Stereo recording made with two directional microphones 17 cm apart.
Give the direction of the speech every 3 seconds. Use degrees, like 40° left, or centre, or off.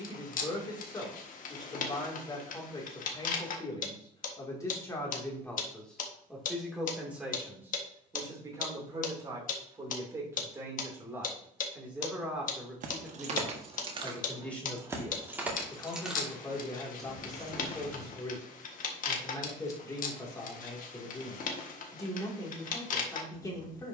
20° left, 20° left, 10° right, 20° right, centre, 20° left, 20° left, 20° left.